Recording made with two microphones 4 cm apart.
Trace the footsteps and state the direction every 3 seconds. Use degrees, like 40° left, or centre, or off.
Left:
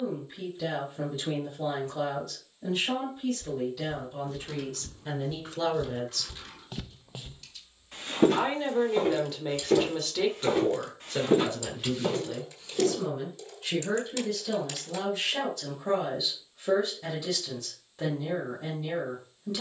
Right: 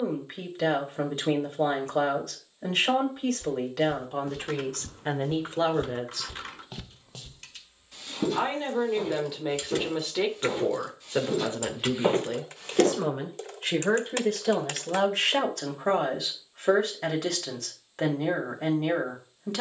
off, 70° right, 10° left, 50° left, 50° right, off, off.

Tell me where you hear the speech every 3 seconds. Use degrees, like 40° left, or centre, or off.
60° right, 50° right, 10° right, 20° right, 50° right, 60° right, 60° right.